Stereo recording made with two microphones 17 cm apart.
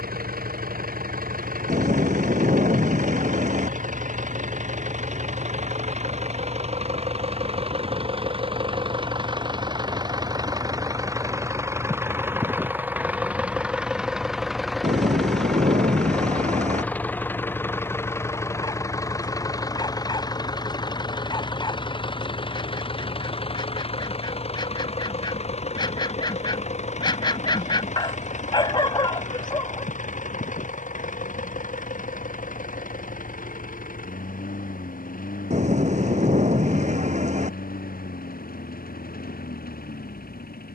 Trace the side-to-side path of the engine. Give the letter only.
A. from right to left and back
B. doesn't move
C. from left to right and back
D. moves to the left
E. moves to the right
D.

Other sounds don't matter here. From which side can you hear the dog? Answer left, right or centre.
left.